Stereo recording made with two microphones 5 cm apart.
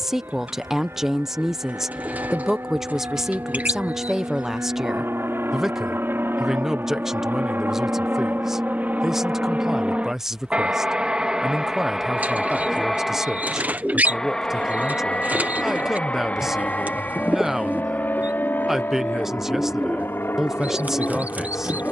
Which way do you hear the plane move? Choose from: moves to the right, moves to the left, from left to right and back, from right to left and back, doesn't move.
moves to the left.